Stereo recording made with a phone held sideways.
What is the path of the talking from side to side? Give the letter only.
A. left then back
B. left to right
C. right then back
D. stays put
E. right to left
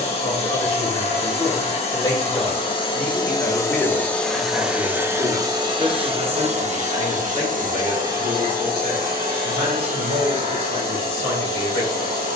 B.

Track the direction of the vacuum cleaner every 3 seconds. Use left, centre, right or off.
left, centre, right, right.